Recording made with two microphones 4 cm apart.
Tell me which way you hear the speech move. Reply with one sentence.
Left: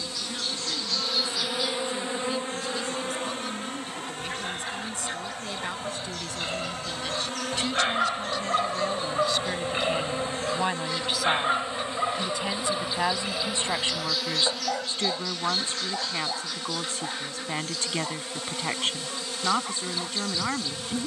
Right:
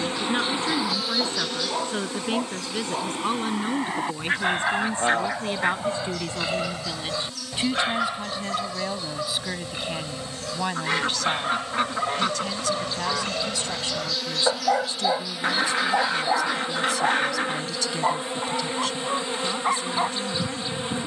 You can hear the speech move from right to left.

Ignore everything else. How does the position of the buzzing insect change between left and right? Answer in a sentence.
You can hear the buzzing insect move from right to left and back again.